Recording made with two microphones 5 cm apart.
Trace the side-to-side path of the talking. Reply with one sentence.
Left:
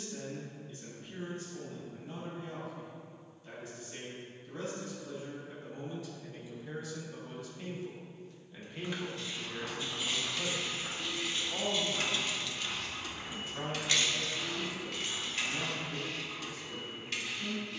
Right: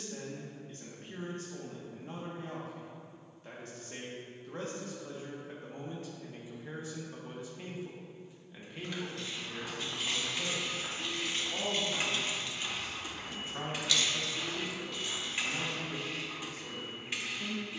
You can hear the talking go left and come back.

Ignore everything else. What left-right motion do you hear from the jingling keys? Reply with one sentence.
In this clip you hear the jingling keys move from right to left.